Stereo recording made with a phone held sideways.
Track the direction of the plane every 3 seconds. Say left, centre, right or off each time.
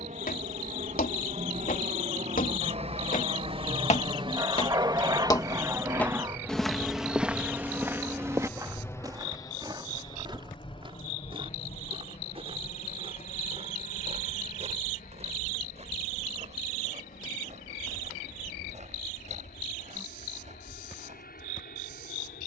right, right, centre, left, left, left, left, left.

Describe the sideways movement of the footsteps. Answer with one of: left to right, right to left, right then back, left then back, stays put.
left to right.